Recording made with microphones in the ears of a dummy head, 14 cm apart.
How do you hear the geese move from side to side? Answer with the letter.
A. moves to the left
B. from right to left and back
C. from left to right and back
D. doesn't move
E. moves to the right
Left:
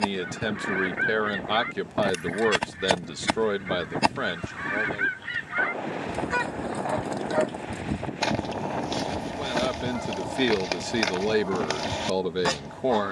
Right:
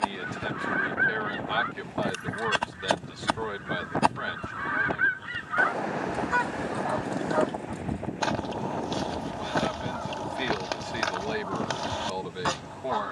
D.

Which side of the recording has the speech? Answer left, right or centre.
left.